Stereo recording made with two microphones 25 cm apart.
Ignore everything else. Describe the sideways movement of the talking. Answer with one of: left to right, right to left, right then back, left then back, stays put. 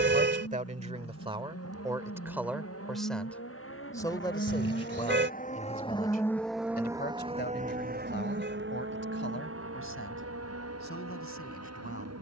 right to left.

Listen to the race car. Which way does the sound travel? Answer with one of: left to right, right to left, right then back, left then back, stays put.
left to right.